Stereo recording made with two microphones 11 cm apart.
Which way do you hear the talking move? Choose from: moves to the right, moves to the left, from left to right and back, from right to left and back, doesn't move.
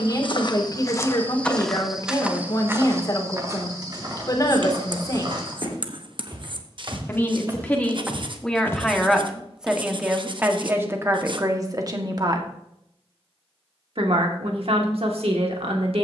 moves to the right.